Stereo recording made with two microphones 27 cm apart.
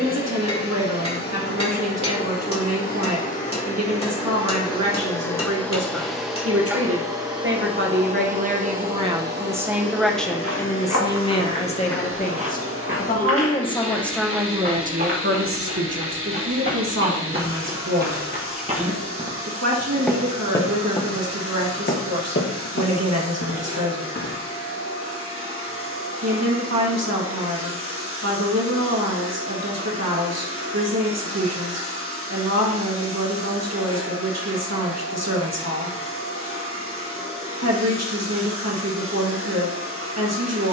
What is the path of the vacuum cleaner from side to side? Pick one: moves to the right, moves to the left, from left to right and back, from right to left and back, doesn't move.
moves to the right.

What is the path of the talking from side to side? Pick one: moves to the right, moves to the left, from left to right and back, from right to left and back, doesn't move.
from right to left and back.